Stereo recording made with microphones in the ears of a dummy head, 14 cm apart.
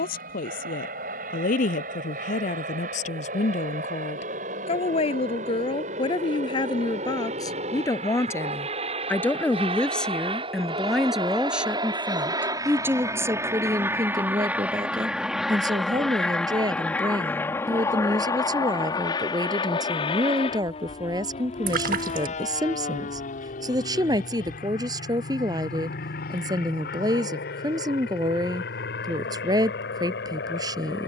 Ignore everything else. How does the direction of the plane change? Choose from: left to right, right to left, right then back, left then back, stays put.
right to left.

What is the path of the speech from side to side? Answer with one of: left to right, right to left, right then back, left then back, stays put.
left to right.